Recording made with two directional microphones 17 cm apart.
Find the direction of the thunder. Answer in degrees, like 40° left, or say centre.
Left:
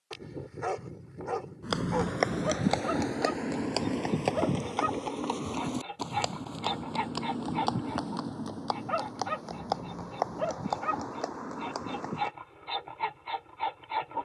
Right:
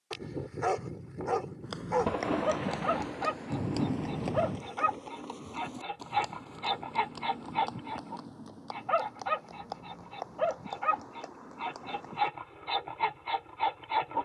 60° right.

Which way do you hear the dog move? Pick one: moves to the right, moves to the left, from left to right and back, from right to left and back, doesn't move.
doesn't move.